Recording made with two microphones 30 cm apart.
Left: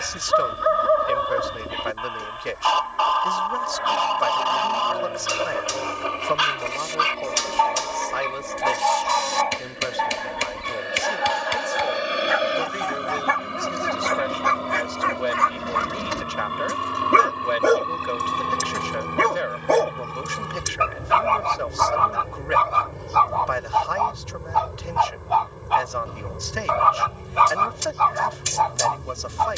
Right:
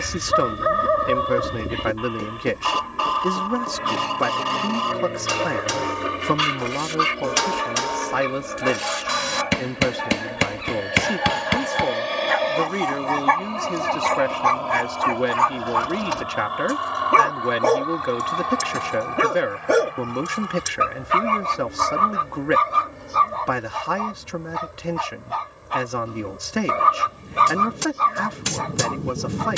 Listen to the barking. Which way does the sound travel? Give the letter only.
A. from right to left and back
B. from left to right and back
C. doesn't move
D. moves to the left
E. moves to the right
A.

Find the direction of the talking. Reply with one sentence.
You can hear the talking on the right.